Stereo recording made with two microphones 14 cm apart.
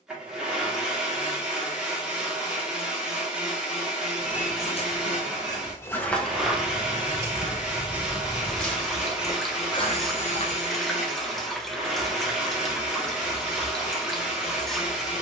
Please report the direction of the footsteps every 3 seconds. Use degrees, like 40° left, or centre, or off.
off, 40° left, 10° right, 40° left, off.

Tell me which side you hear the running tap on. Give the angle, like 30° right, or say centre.
centre.